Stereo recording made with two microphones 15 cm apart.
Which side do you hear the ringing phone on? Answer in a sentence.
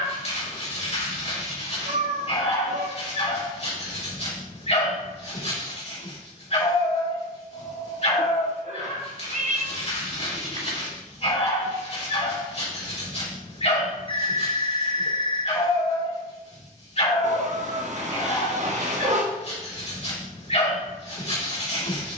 You can hear the ringing phone on the left.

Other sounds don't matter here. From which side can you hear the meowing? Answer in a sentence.
You can hear the meowing on the right.